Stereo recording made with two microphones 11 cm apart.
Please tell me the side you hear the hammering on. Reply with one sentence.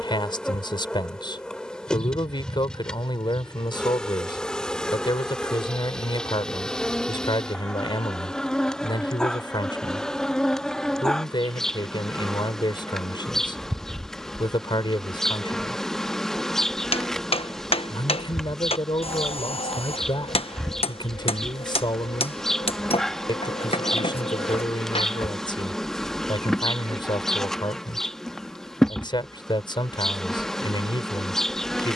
In this clip you hear the hammering on the left.